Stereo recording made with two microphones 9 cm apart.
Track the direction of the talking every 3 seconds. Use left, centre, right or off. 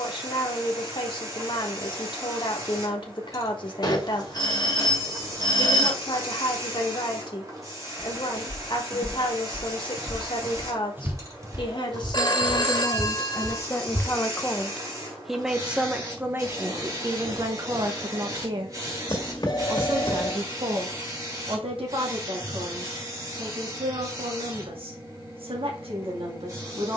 left, left, left, left, left, right, right, right, right.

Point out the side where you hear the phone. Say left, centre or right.
left.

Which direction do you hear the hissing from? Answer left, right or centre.
right.